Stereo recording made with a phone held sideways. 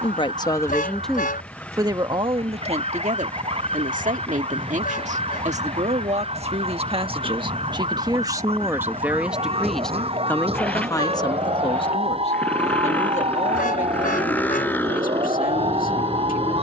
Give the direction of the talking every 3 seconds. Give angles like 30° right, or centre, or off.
10° right, 50° right, 30° right, 20° left, 50° left, 70° left.